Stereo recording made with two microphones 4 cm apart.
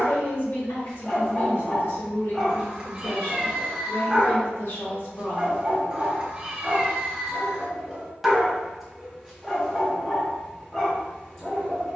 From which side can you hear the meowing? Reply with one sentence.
You can hear the meowing on the right.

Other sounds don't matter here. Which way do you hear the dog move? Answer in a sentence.
You can hear the dog move from left to right and back again.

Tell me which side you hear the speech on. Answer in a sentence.
You can hear the speech on the left.